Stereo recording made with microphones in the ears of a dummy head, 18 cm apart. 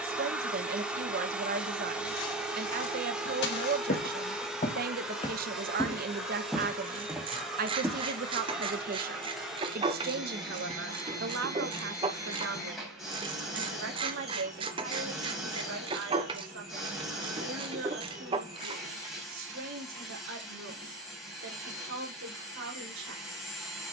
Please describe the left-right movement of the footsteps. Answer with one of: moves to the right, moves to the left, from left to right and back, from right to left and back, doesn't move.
moves to the right.